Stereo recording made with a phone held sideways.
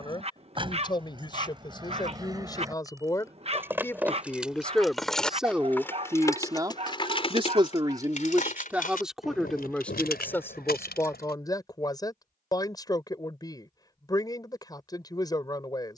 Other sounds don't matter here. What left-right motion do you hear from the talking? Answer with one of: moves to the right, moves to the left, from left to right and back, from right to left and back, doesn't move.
from left to right and back.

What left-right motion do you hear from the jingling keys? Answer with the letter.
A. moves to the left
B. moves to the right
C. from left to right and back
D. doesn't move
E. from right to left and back
A.